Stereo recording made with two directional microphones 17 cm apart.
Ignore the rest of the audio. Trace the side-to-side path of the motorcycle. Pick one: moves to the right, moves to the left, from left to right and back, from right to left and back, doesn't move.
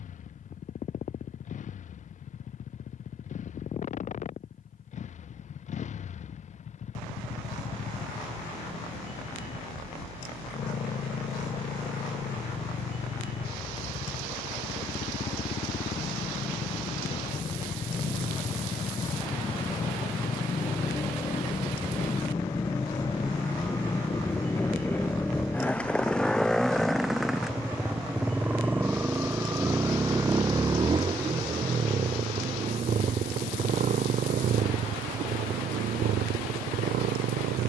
moves to the right.